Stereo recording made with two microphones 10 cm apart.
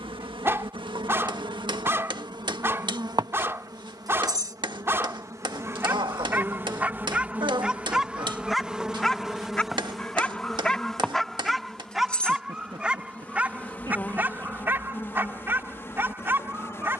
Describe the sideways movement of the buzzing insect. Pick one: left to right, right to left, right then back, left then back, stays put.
right to left.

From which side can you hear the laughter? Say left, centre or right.
right.